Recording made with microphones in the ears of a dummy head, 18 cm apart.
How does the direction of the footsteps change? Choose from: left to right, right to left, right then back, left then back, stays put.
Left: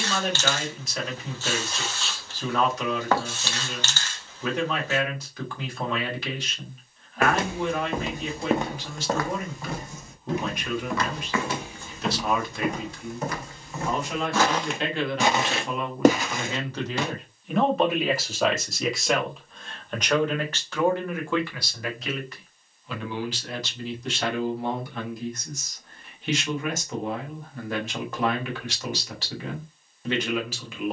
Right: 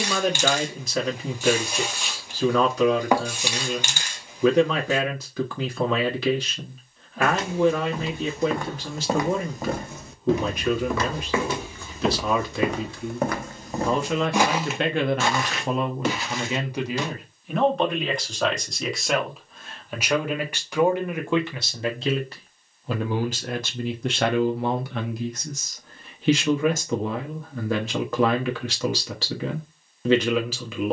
right then back.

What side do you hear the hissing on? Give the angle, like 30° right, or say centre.
10° right.